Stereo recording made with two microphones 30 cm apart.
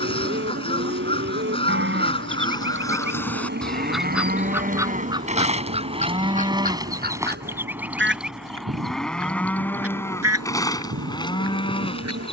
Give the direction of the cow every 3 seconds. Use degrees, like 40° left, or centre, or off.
40° right, 30° right, 10° right, 10° left.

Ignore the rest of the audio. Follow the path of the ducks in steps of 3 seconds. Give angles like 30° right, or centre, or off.
20° left, 10° right, 30° right, 50° right.